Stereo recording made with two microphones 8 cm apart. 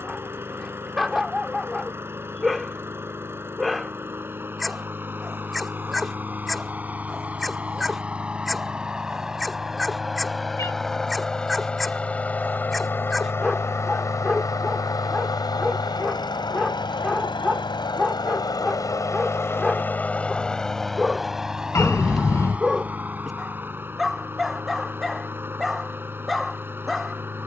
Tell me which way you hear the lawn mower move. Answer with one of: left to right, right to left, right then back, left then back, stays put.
left then back.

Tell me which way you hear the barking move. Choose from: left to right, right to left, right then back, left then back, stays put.
stays put.